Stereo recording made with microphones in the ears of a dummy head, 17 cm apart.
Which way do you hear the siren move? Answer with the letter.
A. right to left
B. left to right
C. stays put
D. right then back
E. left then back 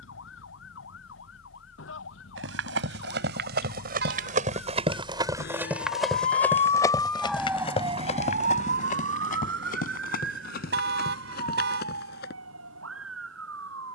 B.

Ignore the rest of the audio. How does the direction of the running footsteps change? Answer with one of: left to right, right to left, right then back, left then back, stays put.
right to left.